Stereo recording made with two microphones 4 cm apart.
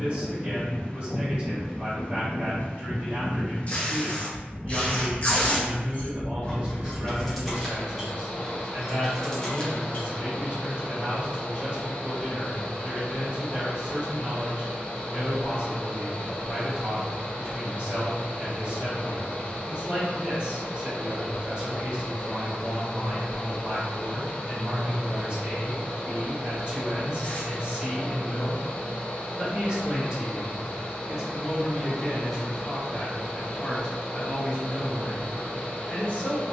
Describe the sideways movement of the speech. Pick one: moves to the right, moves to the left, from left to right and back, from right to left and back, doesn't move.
moves to the left.